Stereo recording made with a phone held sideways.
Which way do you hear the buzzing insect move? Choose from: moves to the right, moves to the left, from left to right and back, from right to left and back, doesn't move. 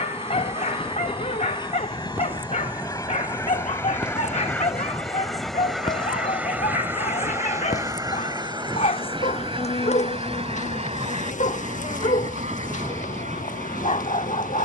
moves to the left.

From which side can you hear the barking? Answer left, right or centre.
left.